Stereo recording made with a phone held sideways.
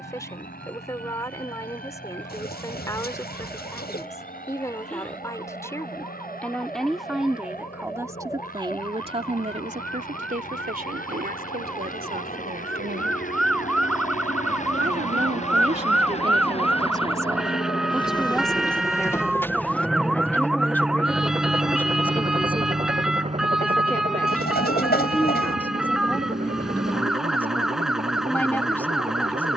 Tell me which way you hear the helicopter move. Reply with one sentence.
In this clip you hear the helicopter travel towards the right.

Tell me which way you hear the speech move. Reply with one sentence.
In this clip you hear the speech move from left to right and back again.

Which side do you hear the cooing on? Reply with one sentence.
You can hear the cooing on the left.